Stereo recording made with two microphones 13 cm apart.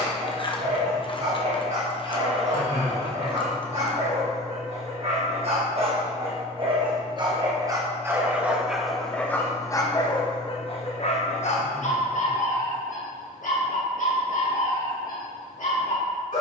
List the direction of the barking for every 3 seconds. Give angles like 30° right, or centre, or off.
60° right, 50° right, 30° right, 40° left, 80° left, 80° left.